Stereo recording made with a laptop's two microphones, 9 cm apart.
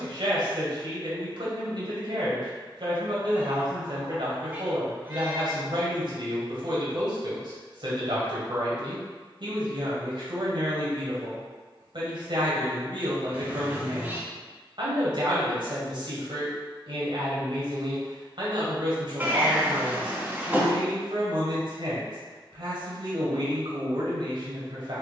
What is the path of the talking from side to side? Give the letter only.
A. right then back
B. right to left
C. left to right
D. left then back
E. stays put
E.